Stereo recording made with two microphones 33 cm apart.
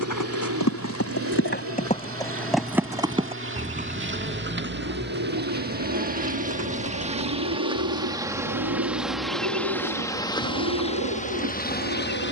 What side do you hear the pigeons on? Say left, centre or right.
right.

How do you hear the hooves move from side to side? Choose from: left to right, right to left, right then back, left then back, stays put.
left to right.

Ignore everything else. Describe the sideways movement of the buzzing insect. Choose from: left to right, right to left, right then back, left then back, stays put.
right to left.